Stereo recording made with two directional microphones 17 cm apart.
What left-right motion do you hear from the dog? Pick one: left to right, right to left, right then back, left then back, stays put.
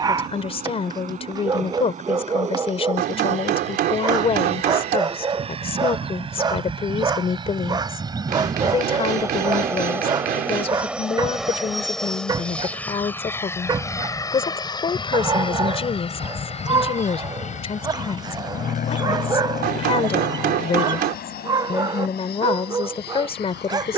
stays put.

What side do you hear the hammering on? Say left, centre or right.
right.